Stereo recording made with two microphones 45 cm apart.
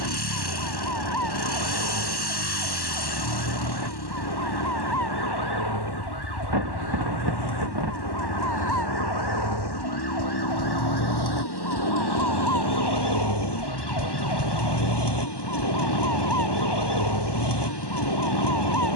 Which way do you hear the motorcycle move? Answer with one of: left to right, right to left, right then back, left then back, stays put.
stays put.